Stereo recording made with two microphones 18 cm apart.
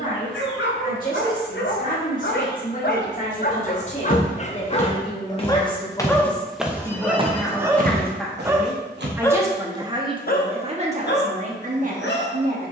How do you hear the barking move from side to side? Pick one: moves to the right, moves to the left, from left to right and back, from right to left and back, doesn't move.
from left to right and back.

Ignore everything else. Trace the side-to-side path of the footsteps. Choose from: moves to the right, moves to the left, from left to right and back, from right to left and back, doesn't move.
moves to the right.